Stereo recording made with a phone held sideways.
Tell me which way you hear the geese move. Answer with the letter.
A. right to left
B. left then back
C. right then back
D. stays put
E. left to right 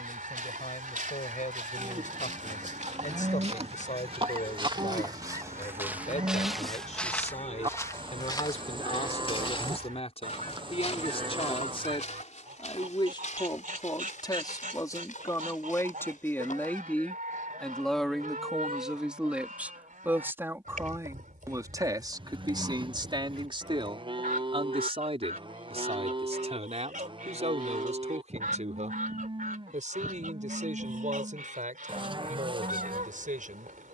D.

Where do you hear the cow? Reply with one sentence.
In this clip you hear the cow on the right.